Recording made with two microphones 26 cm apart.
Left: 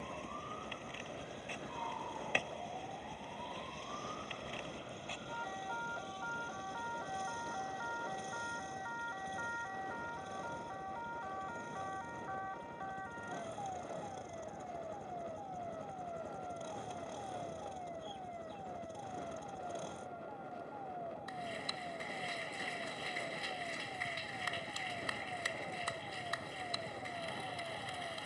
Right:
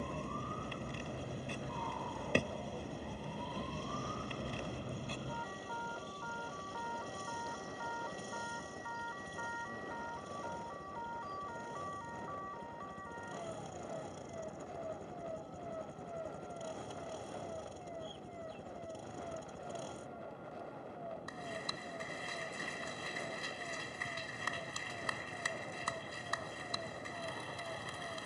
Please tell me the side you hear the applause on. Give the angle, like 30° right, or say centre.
50° right.